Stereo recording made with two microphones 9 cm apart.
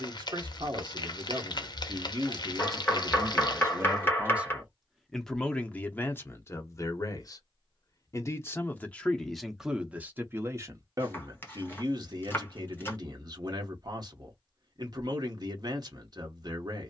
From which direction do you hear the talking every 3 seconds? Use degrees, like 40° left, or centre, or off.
50° right, 10° right, 30° left, 20° right, 50° right, 50° right.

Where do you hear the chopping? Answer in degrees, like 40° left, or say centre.
20° left.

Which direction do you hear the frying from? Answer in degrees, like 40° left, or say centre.
50° left.